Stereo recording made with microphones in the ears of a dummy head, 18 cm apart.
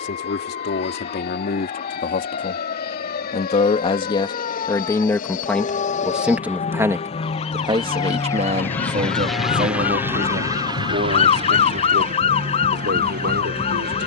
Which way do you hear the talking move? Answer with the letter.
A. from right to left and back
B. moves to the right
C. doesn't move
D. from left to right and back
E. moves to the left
B.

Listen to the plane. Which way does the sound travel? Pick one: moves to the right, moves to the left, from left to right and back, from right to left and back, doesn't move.
moves to the right.